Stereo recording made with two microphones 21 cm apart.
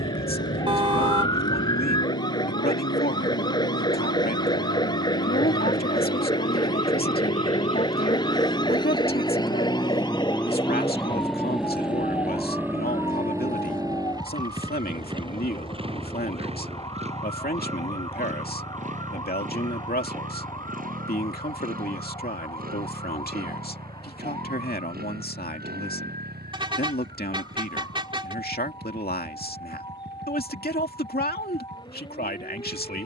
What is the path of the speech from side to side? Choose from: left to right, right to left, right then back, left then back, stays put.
stays put.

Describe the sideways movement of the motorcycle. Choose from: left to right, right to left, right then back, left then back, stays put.
left to right.